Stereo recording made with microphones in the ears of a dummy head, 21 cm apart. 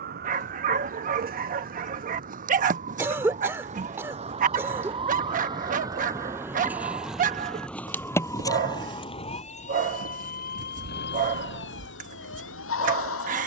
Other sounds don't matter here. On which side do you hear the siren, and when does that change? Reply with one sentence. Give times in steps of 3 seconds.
In this clip you hear the siren on the right from 0 s, in the centre from 6 s and on the left from 9 s.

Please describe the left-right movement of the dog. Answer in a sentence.
You can hear the dog stay put.